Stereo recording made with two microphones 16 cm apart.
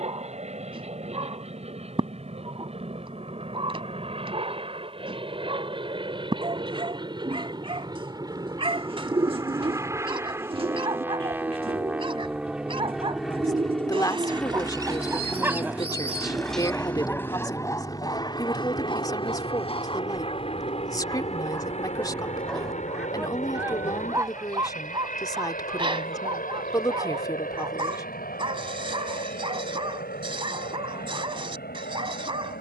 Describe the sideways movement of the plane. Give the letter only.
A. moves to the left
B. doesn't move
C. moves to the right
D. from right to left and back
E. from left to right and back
A.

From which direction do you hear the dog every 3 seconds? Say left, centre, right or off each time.
right, right, right, right, right, centre, left, centre, right, right, right.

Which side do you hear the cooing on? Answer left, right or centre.
right.